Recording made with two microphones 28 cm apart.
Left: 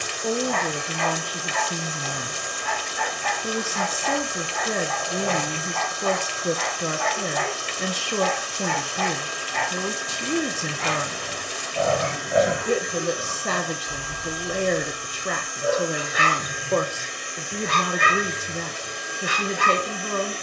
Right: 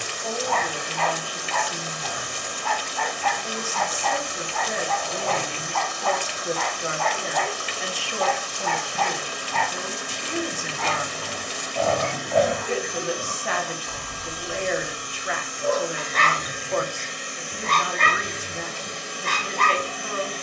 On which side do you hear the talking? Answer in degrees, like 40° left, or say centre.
50° left.